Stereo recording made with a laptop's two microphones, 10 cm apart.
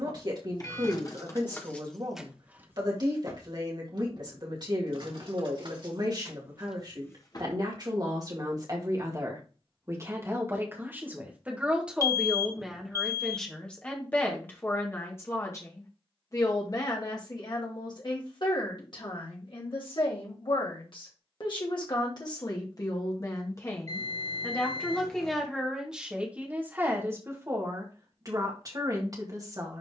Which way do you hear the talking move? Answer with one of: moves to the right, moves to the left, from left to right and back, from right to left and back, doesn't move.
from right to left and back.